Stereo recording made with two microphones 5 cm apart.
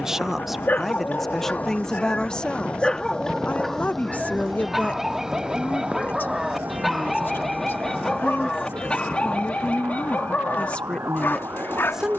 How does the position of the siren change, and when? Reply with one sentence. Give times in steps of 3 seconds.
You can hear the siren on the left from 0 s, in the centre from 3 s and on the right from 6 s.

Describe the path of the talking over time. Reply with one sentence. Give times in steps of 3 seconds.
You can hear the talking in the centre from 0 s and on the left from 3 s.